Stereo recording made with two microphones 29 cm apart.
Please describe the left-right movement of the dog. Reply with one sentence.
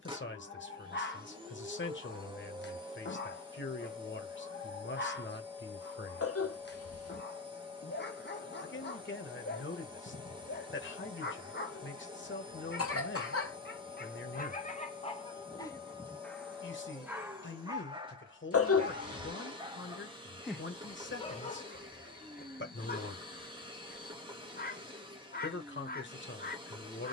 In this clip you hear the dog go right and come back.